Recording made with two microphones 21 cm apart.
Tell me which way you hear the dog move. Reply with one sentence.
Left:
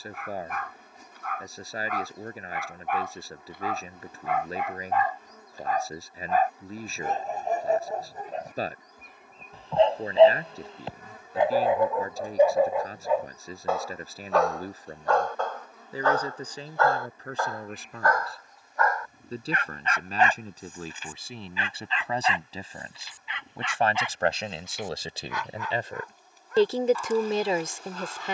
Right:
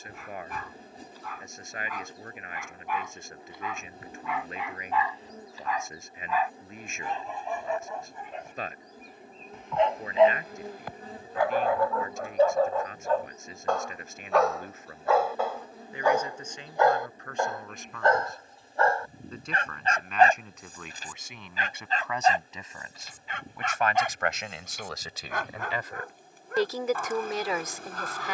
You can hear the dog go from the left side to the right.